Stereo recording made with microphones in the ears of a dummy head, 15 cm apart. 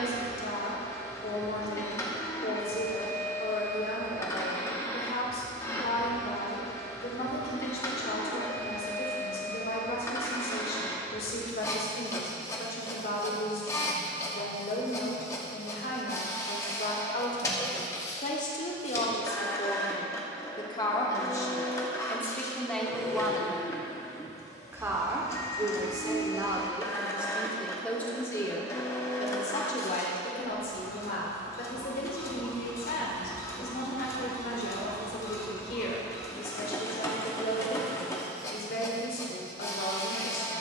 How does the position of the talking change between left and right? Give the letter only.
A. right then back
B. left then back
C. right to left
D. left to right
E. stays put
A.